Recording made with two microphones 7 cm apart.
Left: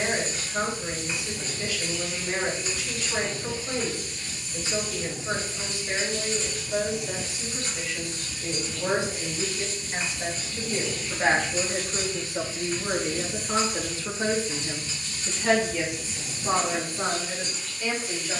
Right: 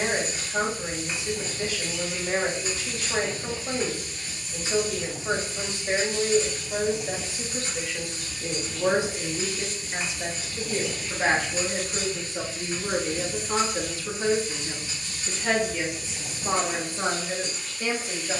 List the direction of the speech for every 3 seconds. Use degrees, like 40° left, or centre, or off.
30° right, 30° right, 30° right, 10° right, 20° left, 10° right.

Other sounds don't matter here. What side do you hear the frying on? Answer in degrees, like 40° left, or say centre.
10° right.